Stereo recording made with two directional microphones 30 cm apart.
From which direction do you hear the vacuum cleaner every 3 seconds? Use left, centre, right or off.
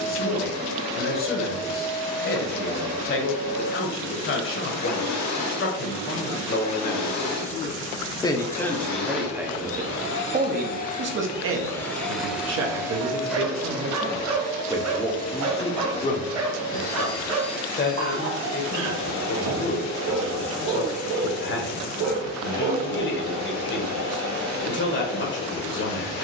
left, left, left, left, centre, left, left, left, left.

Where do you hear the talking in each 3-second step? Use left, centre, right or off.
left, left, left, right, right, left, left, left, left.